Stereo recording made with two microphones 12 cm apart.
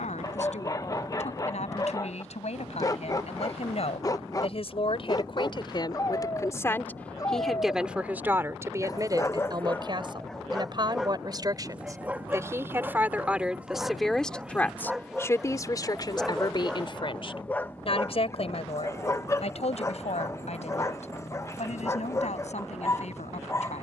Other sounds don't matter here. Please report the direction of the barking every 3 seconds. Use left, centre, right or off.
left, left, left, centre, centre, centre, left, left.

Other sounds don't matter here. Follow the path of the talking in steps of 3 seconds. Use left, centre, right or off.
left, left, centre, right, centre, left, left, left.